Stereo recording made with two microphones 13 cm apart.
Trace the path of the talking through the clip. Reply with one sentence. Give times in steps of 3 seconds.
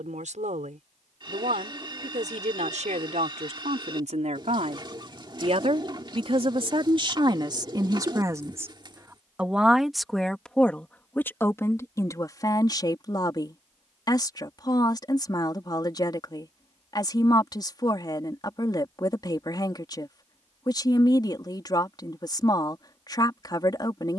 In this clip you hear the talking on the right from 0 s, in the centre from 9 s and on the left from 12 s.